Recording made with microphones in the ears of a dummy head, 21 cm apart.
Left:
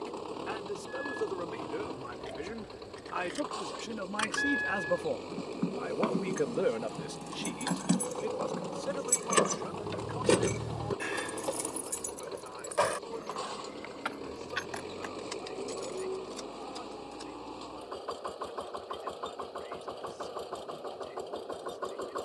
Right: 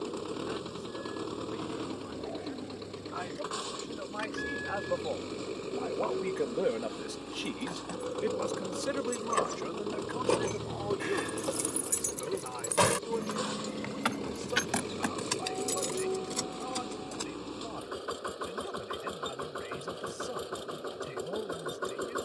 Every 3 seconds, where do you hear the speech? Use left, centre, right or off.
left, left, centre, right, right, right, right, right.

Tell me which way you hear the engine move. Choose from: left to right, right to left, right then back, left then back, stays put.
stays put.